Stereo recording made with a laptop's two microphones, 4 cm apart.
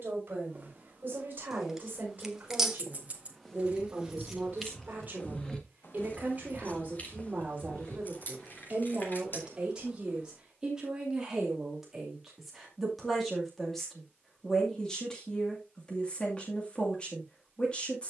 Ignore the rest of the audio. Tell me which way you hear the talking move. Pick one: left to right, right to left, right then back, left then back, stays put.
right to left.